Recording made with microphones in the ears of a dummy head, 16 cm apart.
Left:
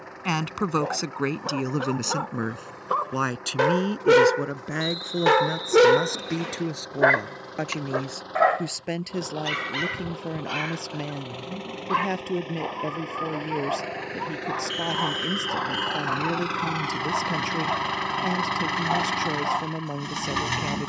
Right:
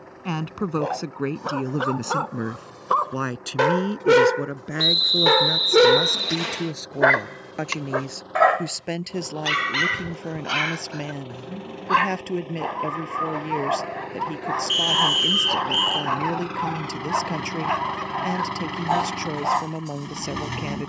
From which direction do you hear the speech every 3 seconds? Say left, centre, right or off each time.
left, centre, centre, centre, centre, centre, centre.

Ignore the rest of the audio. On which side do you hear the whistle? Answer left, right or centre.
right.